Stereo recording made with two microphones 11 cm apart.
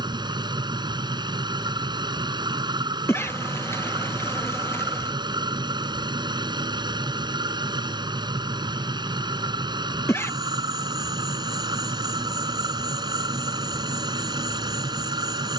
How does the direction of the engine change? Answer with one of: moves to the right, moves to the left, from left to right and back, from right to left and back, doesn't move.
doesn't move.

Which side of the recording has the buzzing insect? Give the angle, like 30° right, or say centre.
20° left.